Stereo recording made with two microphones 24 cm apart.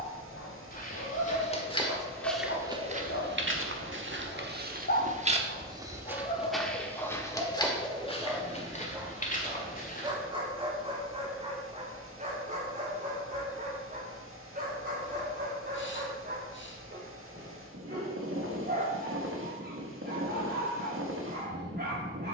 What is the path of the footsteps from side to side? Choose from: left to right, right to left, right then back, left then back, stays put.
right then back.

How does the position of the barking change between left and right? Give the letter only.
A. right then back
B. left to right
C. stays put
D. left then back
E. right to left
B.